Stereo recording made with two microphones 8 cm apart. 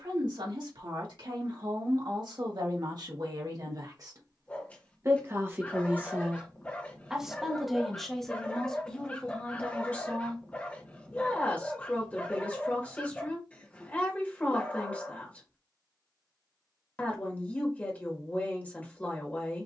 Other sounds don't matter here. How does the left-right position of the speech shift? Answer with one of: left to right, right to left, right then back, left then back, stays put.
right to left.